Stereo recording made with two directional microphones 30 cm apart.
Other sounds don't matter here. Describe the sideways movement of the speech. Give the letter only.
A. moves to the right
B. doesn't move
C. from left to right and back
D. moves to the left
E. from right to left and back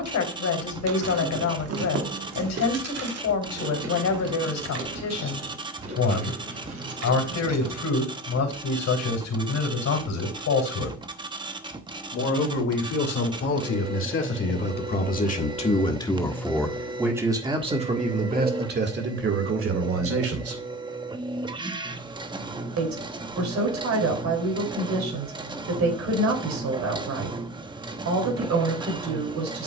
A.